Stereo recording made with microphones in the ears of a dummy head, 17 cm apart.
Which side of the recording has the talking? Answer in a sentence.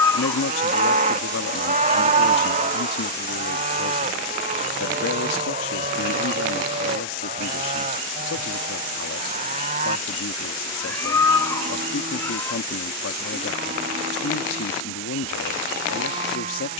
In this clip you hear the talking on the left.